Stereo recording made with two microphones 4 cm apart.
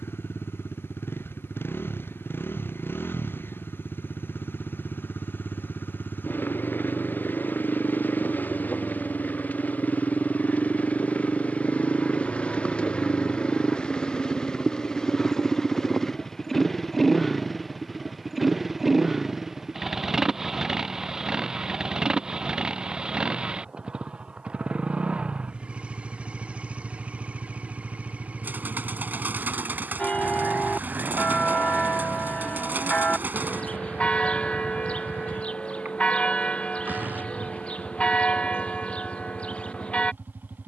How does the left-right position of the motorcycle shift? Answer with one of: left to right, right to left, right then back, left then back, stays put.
left to right.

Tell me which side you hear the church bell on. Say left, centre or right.
left.